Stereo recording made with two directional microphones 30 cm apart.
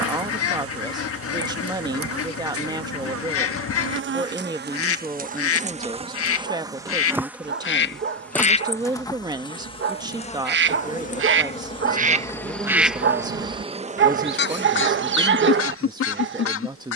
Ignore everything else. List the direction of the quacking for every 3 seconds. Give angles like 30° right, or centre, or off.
50° left, 50° left, 40° left, 40° right, 20° left, 50° left.